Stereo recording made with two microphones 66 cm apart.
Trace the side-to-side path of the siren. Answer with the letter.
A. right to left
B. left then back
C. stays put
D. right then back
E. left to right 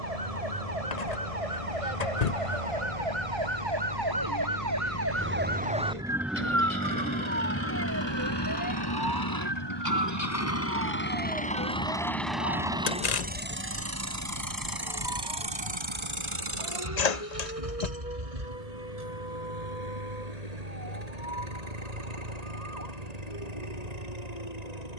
A.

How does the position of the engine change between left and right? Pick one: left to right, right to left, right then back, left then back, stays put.
left to right.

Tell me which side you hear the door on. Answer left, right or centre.
left.